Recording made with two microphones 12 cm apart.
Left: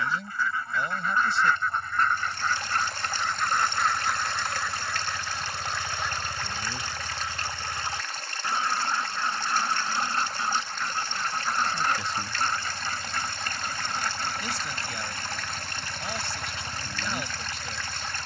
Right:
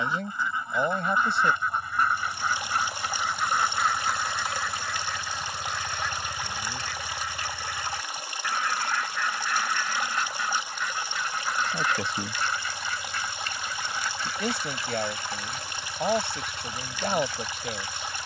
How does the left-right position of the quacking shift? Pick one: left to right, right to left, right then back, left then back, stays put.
right to left.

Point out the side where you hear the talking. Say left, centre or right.
right.